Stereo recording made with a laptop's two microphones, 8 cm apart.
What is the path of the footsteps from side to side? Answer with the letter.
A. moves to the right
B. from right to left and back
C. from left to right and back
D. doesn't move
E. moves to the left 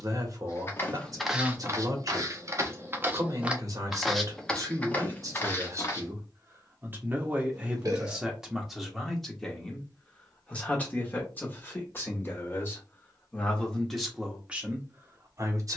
C.